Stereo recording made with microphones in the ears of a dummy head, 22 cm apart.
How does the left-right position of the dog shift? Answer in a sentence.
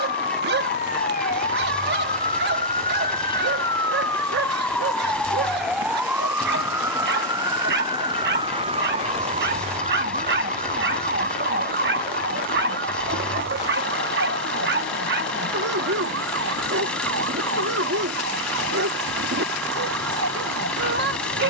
In this clip you hear the dog stay put.